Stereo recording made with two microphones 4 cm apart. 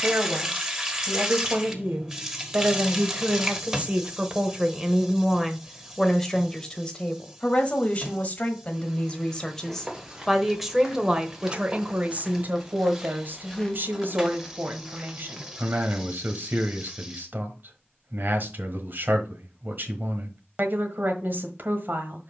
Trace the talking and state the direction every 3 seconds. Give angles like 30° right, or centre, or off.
50° right, 20° right, 20° left, centre, 50° right, 50° right, 50° right, 50° right.